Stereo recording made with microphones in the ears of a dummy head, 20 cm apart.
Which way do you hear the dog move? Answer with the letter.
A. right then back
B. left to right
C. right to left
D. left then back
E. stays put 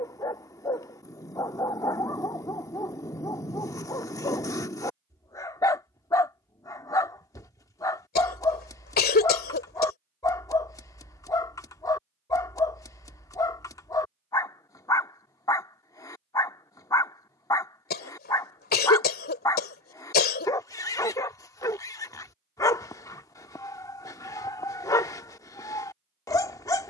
E.